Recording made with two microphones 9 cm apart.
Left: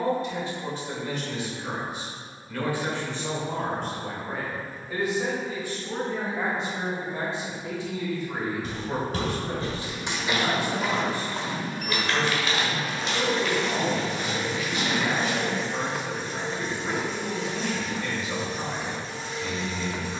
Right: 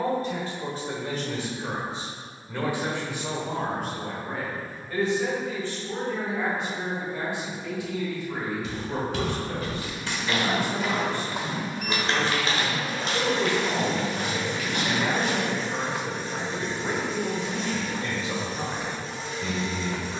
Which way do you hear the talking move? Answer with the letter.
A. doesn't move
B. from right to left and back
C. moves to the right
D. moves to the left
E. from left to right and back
B.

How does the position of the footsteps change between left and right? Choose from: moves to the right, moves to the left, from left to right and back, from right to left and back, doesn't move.
moves to the right.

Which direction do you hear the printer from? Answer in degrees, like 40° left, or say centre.
centre.